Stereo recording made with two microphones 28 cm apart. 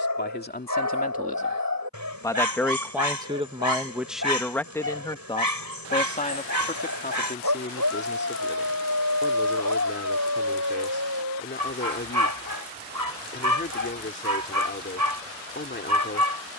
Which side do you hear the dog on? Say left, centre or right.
right.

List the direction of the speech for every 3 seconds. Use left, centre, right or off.
left, centre, left, left, left, left.